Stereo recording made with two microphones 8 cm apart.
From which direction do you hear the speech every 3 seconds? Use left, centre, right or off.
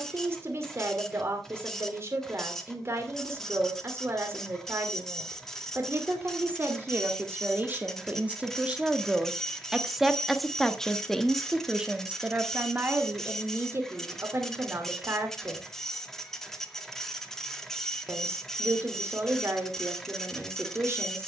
right, right, right, centre, right, right, right.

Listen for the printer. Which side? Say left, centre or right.
centre.